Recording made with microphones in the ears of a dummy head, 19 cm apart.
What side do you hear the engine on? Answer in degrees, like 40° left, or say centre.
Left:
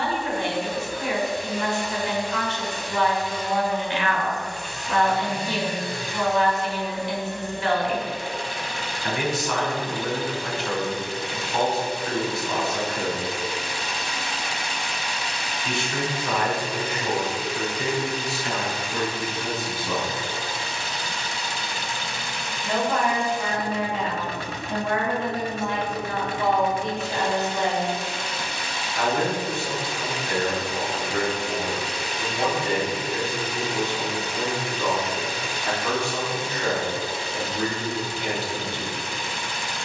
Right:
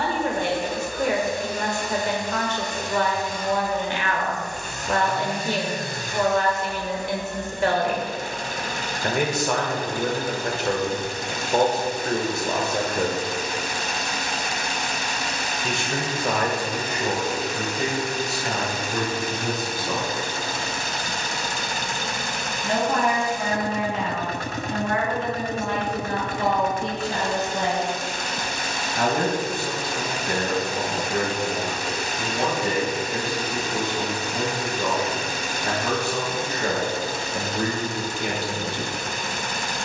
40° right.